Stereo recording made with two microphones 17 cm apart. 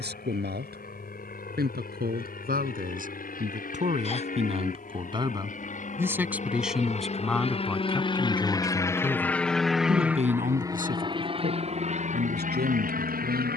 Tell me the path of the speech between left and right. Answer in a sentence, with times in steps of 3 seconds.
You can hear the speech on the right from 0 s, in the centre from 6 s and on the right from 9 s.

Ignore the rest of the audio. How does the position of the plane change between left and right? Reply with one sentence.
In this clip you hear the plane go from the left side to the right.